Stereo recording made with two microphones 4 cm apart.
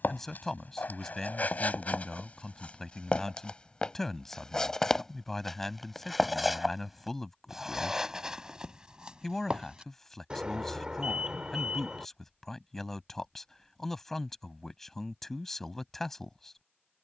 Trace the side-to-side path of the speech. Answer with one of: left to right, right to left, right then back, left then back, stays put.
stays put.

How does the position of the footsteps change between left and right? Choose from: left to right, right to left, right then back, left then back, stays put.
left to right.